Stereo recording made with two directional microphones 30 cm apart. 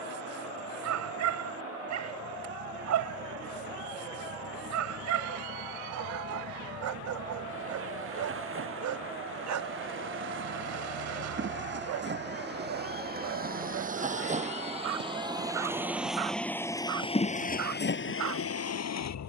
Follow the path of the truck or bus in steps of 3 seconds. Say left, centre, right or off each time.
right, right, right, right, right, centre, left.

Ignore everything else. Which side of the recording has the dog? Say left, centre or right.
right.